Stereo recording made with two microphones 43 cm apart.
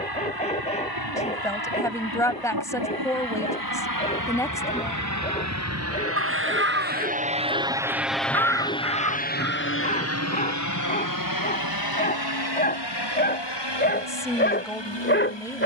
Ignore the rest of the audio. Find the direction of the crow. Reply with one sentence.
In this clip you hear the crow on the right.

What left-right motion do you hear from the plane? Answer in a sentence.
In this clip you hear the plane move from right to left.